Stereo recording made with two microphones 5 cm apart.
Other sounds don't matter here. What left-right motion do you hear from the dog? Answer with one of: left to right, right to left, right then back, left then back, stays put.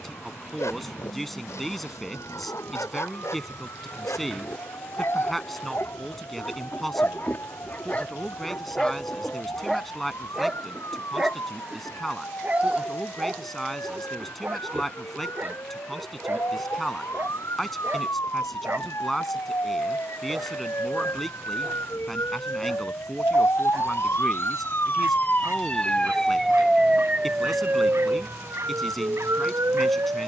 left to right.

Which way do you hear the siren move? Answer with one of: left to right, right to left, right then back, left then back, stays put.
left to right.